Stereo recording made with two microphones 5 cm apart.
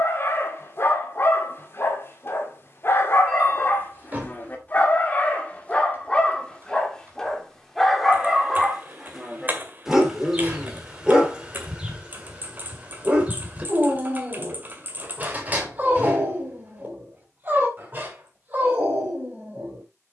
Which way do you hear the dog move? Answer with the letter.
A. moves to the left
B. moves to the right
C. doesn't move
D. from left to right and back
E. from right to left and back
B.